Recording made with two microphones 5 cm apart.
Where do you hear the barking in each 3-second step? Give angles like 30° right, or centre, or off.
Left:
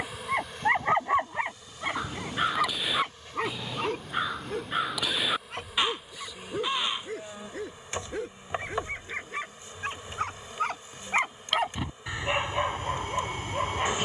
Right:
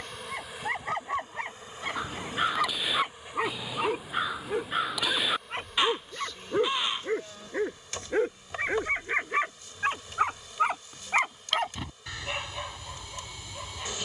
20° left, 20° right, 30° right, 10° right, 30° left.